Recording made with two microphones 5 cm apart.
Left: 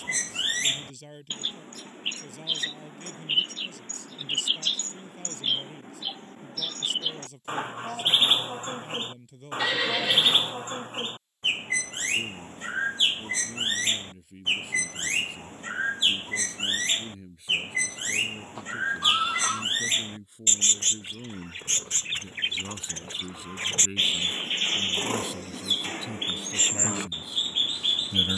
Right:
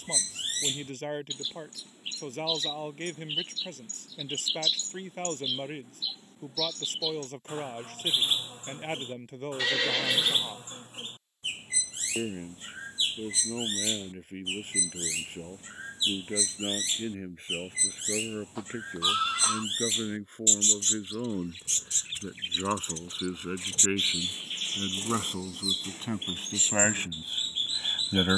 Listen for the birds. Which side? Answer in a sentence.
You can hear the birds on the left.